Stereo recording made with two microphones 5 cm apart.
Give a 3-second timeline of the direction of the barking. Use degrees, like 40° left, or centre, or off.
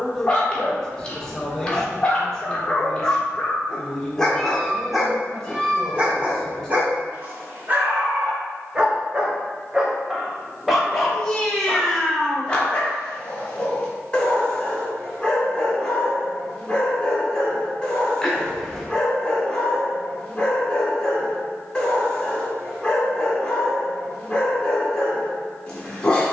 20° left, centre, 30° right, centre, 20° left, 20° left, 20° left, 20° left, 20° left.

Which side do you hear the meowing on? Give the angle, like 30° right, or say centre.
centre.